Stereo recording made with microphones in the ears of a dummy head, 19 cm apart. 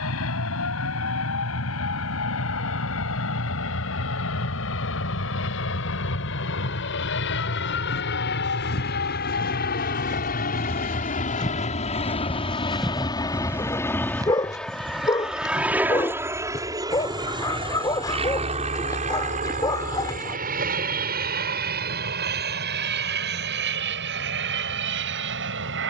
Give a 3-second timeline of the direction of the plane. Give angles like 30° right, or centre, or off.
80° left, 70° left, 60° left, 40° left, 10° left, 10° right, 30° right, 50° right, 50° right.